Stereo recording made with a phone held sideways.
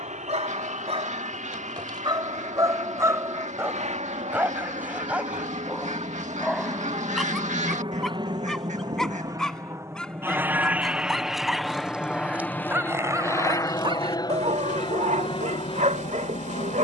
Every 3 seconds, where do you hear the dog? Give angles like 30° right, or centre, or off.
40° right, 10° right, centre, centre, 30° right, 60° right.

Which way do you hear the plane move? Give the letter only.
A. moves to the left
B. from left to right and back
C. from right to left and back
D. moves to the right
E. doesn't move
A.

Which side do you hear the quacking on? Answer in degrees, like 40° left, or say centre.
60° right.